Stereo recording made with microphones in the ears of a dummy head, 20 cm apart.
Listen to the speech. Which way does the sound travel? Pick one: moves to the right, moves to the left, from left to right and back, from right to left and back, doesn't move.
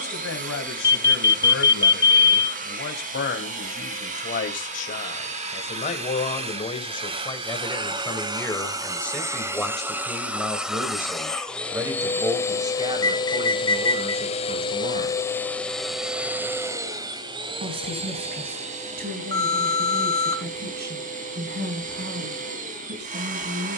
moves to the right.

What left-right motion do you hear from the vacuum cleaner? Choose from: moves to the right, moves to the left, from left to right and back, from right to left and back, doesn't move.
from right to left and back.